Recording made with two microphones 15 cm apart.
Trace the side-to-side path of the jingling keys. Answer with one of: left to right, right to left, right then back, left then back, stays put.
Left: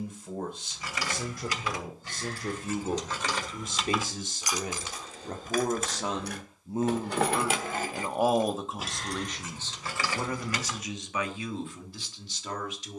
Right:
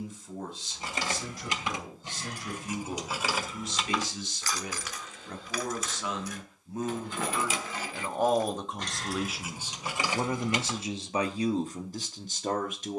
left then back.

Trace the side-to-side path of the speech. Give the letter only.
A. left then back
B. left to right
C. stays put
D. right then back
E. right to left
B.